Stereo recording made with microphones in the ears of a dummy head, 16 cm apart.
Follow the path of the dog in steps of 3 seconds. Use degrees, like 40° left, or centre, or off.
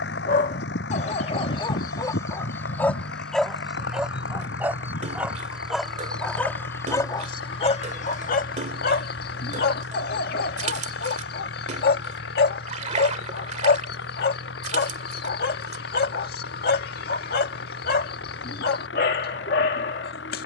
30° left, centre, 30° left, 50° left, 50° left, 50° left, 50° left.